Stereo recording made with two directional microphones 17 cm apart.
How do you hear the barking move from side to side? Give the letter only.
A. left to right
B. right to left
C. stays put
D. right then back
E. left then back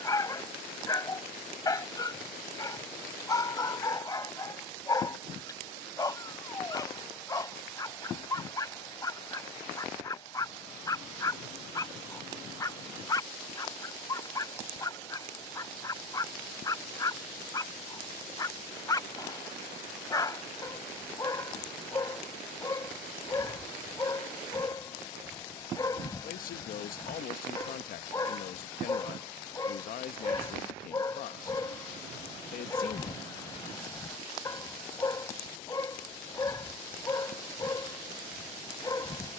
C.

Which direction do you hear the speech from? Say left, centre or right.
left.